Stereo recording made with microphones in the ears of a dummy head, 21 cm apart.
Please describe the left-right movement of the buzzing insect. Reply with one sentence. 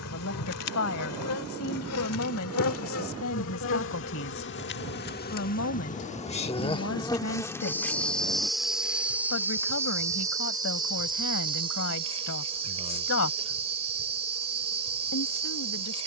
You can hear the buzzing insect move from left to right.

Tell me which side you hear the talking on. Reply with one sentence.
You can hear the talking on the left.